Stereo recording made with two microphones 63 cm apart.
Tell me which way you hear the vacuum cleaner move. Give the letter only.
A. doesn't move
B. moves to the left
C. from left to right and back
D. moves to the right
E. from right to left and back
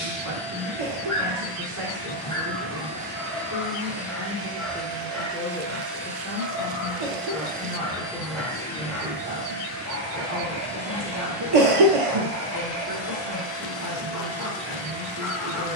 C.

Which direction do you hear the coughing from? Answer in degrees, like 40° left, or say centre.
60° right.